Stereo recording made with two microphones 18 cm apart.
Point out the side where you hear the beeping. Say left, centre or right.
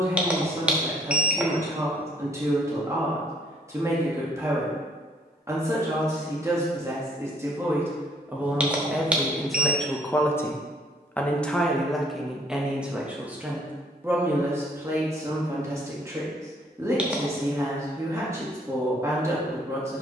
centre.